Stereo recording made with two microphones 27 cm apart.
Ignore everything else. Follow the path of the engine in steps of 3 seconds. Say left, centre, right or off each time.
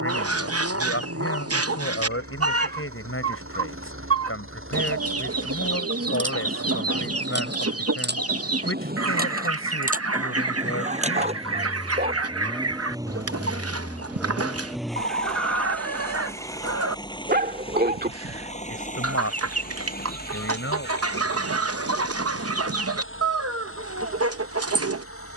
right, right, right, right, centre, centre, left, left, left.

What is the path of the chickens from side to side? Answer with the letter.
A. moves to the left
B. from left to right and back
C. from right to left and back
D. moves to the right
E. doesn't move
E.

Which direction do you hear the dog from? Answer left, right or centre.
right.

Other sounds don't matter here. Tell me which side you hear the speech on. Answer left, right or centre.
left.